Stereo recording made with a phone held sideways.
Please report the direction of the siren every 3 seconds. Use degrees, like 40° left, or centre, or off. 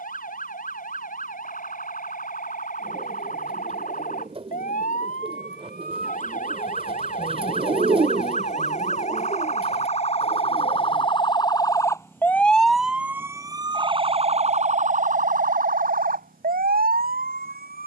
70° left, 60° left, 60° left, 40° left, 20° right, 70° right.